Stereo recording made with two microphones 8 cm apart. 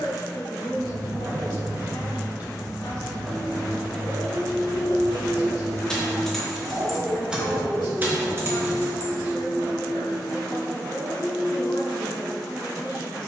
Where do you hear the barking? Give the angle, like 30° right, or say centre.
50° right.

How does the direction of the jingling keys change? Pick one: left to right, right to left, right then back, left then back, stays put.
left then back.